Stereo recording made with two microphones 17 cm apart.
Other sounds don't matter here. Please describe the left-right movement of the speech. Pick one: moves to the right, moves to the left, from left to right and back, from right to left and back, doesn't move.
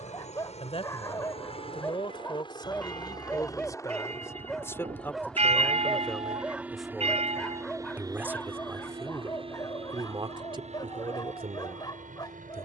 moves to the right.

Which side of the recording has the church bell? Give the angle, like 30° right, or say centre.
40° right.